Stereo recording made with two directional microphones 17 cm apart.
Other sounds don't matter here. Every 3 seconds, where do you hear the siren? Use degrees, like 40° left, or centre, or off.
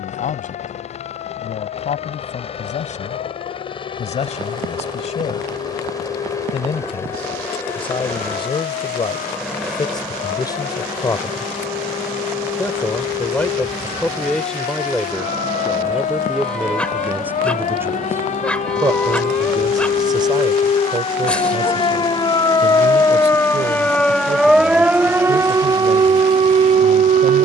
70° left, 60° left, 60° left, 60° left, 60° left, 50° left, 40° left, 20° left, 20° right.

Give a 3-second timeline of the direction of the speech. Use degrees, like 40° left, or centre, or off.
50° left, 40° left, 30° left, 20° left, 10° left, 10° right, 20° right, 40° right, 50° right.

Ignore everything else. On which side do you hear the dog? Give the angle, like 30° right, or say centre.
10° left.